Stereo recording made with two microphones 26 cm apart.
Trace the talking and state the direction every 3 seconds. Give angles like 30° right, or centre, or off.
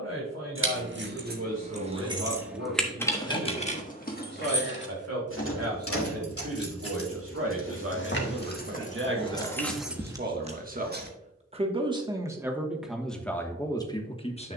70° right, 70° right, 60° right, 40° right, 10° left.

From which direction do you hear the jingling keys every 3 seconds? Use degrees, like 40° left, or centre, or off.
30° right, 40° left, 50° left, 10° right, off.